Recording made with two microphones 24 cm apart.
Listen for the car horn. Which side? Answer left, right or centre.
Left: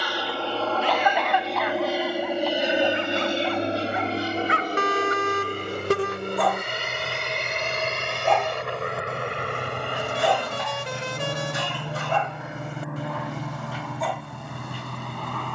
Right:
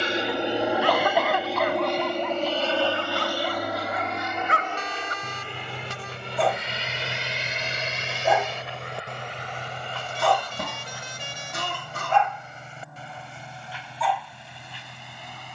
left.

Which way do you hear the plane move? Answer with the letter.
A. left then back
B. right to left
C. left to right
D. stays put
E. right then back
B.